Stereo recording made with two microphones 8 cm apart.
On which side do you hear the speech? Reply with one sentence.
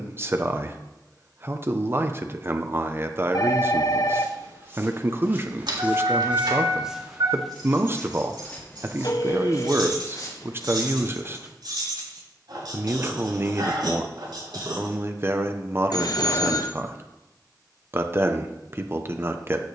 You can hear the speech on the right.